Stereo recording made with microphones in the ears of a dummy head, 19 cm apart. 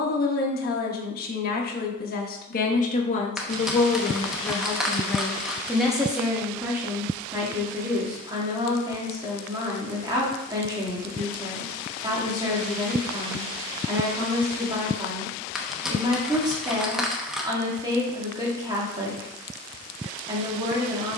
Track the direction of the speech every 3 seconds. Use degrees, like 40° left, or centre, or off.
50° left, 20° left, 10° right, 20° right, 20° right, 20° right, 20° right.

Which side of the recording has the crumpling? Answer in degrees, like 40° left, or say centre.
centre.